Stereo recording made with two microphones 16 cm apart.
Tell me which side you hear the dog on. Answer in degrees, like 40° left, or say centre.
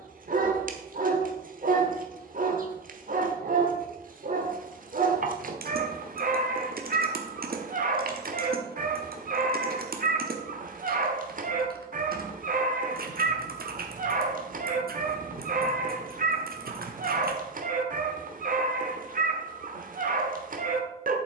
60° right.